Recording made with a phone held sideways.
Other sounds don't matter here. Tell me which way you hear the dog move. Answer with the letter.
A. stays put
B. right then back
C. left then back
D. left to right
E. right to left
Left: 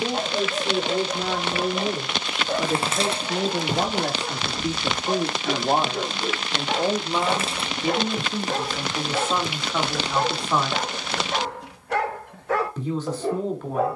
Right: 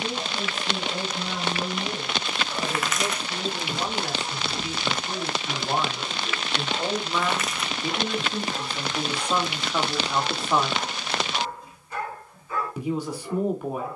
A.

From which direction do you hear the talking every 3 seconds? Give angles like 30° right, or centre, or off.
80° left, 50° left, 20° left, centre, 10° right.